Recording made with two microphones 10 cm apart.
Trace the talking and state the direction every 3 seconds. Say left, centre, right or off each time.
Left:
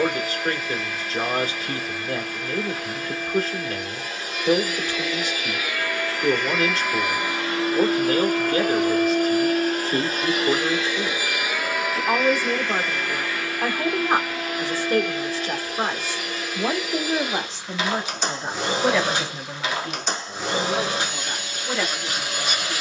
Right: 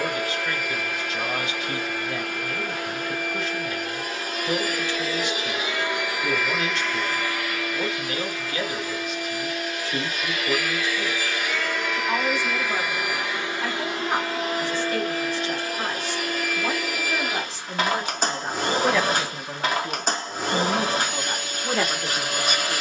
left, left, left, left, left, left, centre, right.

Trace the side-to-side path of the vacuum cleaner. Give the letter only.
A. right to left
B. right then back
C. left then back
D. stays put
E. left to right
C.